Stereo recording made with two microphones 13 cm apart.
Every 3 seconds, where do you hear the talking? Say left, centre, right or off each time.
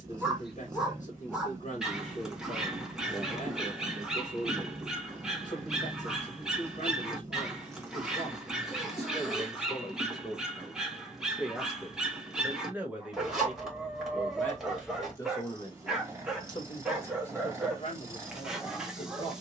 left, left, left, left, centre, left, left.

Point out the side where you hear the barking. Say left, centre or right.
centre.